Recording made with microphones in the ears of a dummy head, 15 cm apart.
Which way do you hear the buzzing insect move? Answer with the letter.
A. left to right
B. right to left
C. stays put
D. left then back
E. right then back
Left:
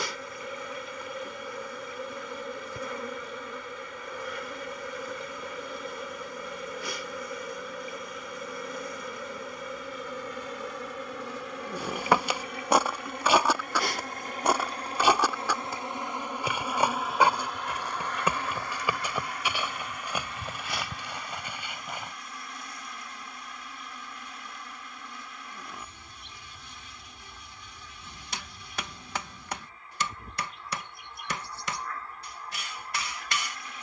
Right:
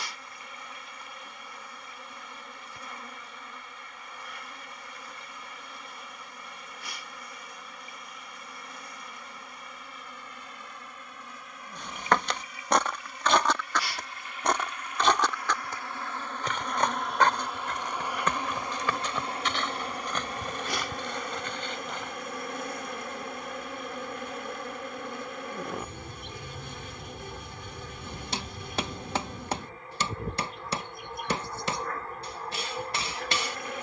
A.